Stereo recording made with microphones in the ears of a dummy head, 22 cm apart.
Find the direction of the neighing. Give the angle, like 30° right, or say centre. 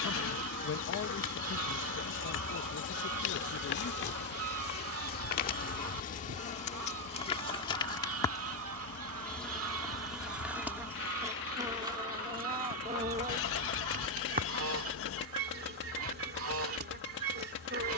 60° left.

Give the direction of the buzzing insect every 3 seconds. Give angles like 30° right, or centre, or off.
50° left, 40° left, 20° left, 10° right, 30° right, 40° right.